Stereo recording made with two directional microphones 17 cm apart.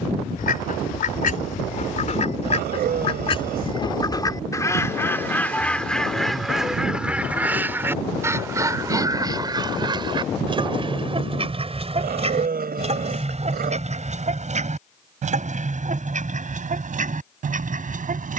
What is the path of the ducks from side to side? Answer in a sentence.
You can hear the ducks go from the left side to the right.